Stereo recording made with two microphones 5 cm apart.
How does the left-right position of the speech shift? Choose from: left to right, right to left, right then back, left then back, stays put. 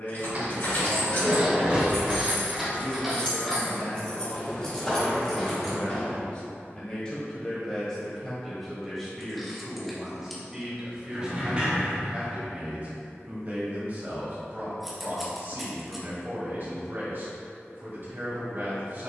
left to right.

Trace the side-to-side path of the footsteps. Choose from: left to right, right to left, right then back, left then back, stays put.
right to left.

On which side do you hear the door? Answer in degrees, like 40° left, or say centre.
30° right.